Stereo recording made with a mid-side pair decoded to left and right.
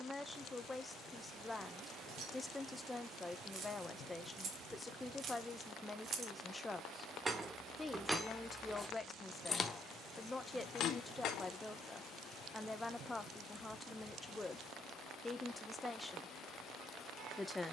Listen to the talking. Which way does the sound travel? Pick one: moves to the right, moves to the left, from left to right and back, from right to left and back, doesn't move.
doesn't move.